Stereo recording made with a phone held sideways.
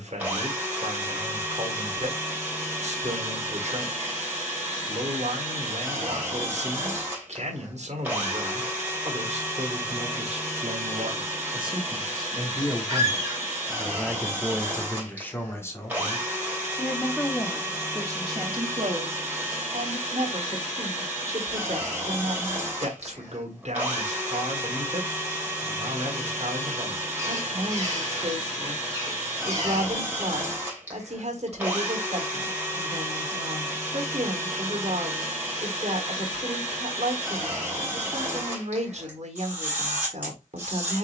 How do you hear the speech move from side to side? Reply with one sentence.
You can hear the speech move from right to left and back again.